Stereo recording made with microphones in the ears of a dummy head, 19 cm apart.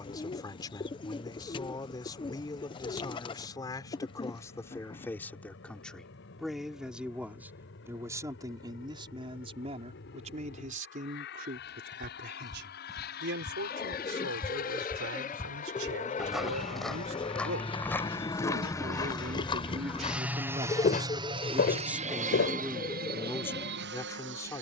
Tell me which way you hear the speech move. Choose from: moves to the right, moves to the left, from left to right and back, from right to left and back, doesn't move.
from left to right and back.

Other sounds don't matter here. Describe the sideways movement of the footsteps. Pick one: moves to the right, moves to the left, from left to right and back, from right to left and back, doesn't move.
moves to the left.